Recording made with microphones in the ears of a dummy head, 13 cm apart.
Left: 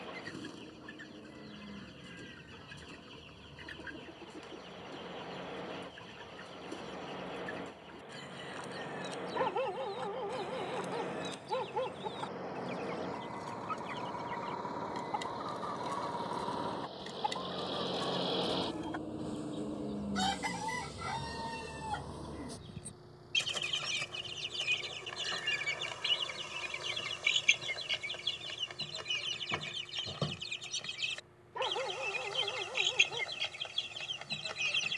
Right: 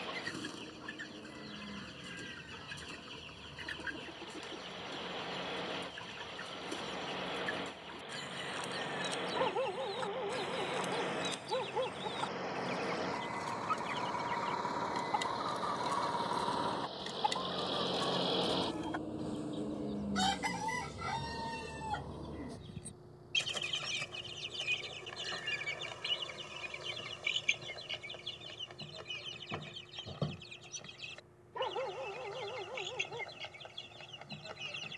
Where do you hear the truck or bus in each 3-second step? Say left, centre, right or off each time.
right, right, right, right, right, right, centre, left, left, left, left, left.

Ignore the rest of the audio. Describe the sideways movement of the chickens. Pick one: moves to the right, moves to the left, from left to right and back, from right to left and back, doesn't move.
moves to the left.